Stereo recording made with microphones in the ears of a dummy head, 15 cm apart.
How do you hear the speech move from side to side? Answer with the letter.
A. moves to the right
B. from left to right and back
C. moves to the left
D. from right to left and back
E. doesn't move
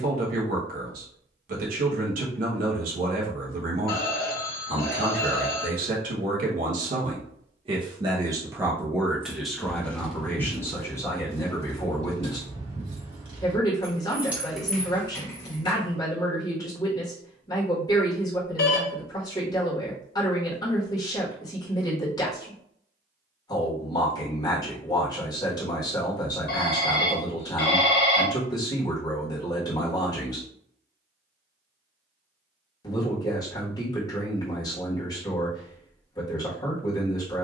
C.